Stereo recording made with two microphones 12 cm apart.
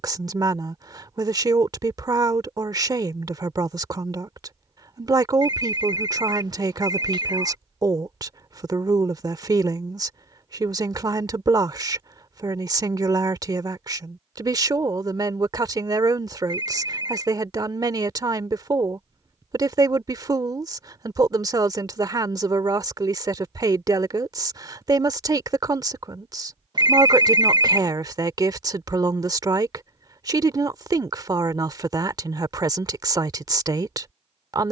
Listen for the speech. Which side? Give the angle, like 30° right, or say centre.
30° right.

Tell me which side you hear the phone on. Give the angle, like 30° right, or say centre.
40° right.